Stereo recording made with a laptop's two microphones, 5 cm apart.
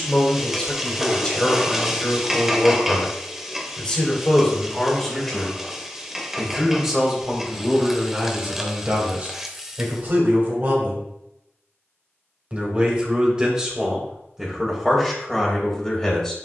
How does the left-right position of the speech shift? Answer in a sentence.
In this clip you hear the speech move from left to right and back again.